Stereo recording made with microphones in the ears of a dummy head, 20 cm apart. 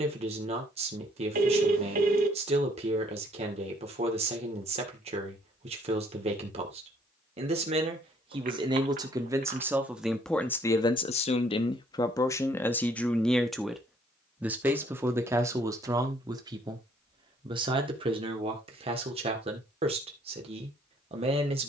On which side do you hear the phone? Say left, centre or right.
right.